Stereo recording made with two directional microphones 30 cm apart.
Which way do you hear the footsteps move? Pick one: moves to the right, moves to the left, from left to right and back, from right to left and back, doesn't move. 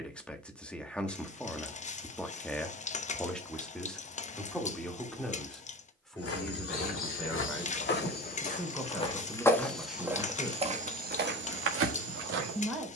moves to the right.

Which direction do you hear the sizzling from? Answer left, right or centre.
left.